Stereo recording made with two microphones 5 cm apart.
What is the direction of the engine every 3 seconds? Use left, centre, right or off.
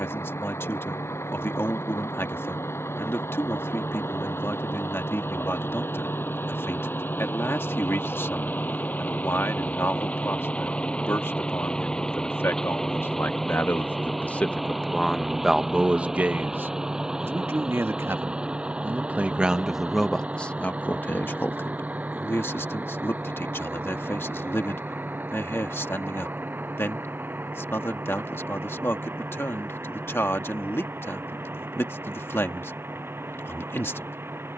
left, left, left, left, centre, centre, right, right, right, right, right, right.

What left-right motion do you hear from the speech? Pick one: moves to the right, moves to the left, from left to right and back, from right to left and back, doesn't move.
from left to right and back.